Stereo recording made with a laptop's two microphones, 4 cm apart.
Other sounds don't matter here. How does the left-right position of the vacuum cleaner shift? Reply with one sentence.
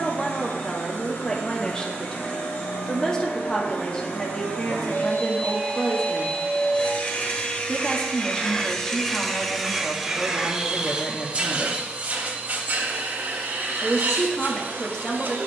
In this clip you hear the vacuum cleaner go from the left side to the right.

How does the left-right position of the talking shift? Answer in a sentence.
In this clip you hear the talking stay in one place.